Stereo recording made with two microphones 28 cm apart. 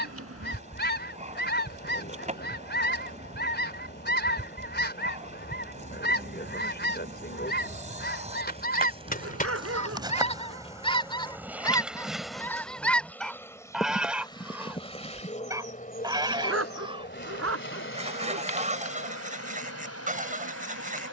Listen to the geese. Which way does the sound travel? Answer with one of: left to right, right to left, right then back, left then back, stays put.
left to right.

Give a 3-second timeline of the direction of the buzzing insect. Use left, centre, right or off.
right, right, right, centre, centre, left, left.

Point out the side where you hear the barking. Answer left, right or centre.
right.